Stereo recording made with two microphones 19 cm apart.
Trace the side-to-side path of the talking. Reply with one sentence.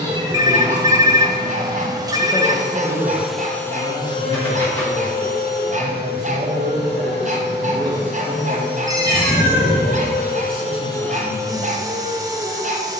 You can hear the talking move from left to right and back again.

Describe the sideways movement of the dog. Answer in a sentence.
You can hear the dog stay in one place.